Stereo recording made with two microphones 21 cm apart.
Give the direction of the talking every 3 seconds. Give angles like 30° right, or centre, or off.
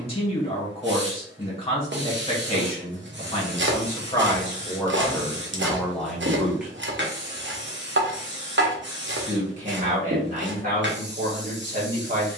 30° left, 20° left, centre, 40° right.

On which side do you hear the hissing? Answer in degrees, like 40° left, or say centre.
60° right.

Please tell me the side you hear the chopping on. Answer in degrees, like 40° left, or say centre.
60° right.